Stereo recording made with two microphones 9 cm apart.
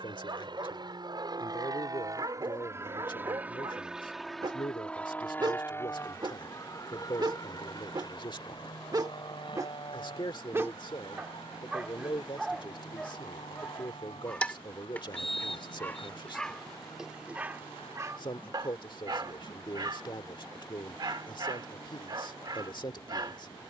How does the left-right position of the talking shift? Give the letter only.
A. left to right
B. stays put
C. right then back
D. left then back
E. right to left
B.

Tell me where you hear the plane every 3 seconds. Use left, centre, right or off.
right, centre, left, left, left, left, left, left.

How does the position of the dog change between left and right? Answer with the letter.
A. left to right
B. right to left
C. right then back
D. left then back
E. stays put
D.